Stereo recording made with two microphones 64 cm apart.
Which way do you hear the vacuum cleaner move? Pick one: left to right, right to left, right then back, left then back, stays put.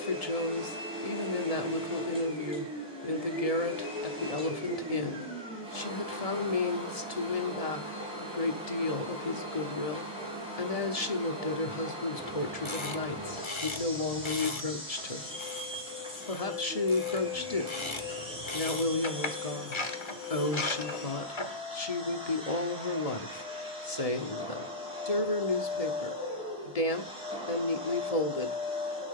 stays put.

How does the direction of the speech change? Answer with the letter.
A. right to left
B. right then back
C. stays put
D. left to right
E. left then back
C.